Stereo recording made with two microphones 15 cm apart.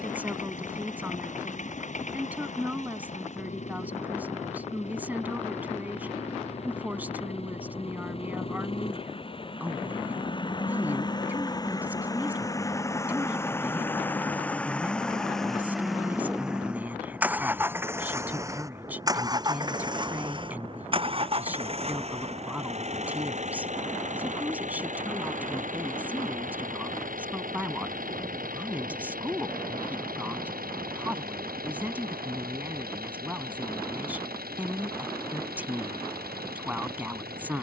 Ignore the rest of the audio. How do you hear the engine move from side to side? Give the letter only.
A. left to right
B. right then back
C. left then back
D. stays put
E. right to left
A.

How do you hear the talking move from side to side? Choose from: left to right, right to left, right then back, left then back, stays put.
stays put.